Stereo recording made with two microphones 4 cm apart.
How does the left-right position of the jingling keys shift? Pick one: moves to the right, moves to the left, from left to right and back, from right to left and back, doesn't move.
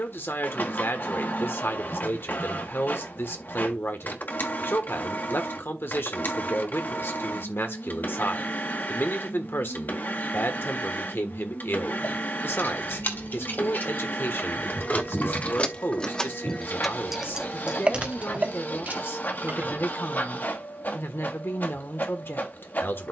moves to the right.